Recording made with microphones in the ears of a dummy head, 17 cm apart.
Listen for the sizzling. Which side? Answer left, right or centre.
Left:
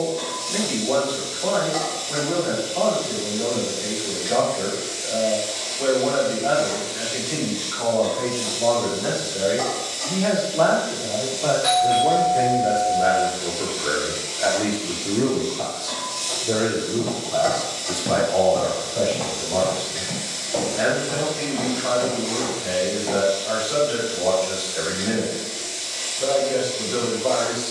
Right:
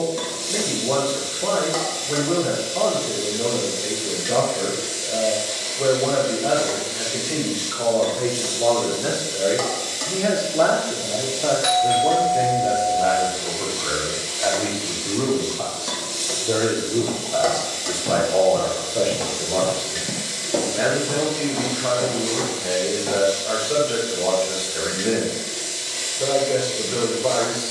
right.